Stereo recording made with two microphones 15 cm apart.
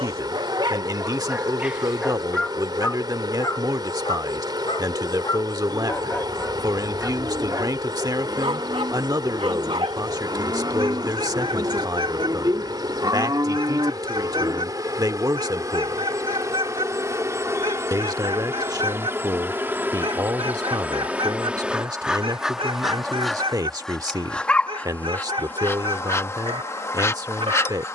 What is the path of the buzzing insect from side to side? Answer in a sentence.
You can hear the buzzing insect go from the right side to the left.